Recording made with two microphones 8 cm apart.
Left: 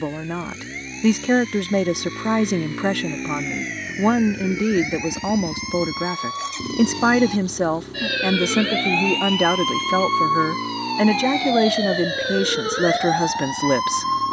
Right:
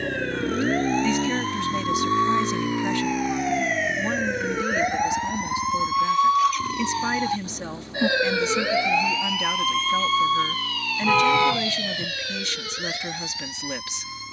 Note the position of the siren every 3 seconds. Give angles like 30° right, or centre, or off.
60° right, 50° right, 30° right, 20° left, 50° left.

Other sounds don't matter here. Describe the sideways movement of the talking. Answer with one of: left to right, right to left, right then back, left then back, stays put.
stays put.